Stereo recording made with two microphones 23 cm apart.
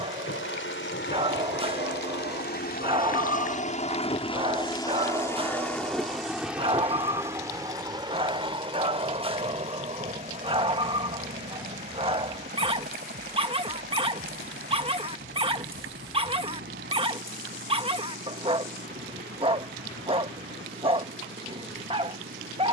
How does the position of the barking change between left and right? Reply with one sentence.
In this clip you hear the barking stay put.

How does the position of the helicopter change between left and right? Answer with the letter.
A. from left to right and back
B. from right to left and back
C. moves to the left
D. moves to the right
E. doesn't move
D.